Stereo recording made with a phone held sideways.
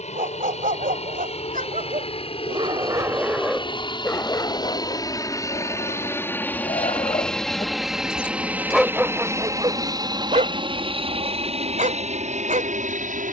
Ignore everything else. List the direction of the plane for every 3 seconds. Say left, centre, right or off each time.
left, left, centre, right, right.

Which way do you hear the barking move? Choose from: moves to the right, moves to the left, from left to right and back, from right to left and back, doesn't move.
from right to left and back.